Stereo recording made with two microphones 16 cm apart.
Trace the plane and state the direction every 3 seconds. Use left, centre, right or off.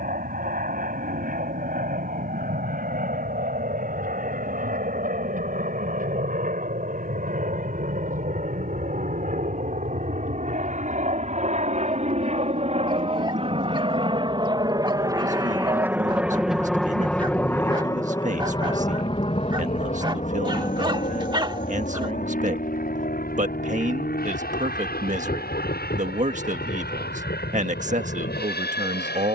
right, right, right, right, right, centre, left, left, left, left.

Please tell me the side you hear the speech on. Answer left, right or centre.
right.